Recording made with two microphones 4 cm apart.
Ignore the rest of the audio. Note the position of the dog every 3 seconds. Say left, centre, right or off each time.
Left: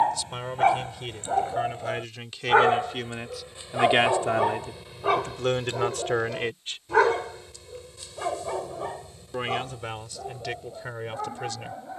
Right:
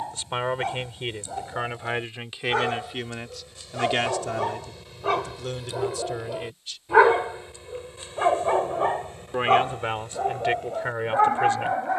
left, centre, right, right.